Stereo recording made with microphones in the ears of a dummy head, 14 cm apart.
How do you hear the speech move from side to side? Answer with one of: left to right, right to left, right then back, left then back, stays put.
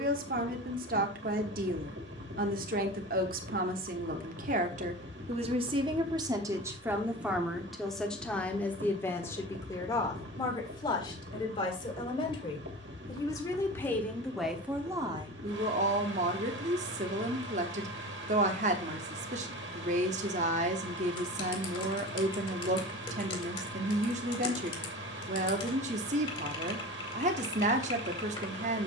left then back.